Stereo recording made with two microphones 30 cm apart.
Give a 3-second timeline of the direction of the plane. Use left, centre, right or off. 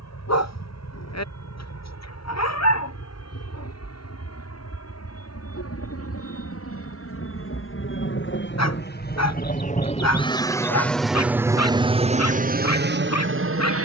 left, left, left, centre, right.